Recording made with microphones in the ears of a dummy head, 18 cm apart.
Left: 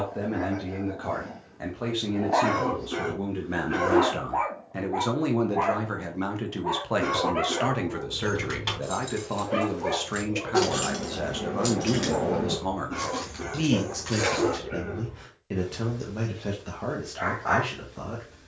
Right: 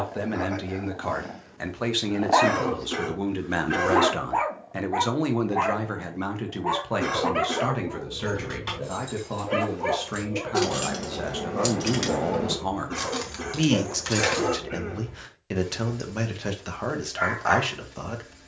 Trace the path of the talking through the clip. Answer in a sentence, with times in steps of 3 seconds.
You can hear the talking on the right from 0 s, in the centre from 6 s and on the right from 12 s.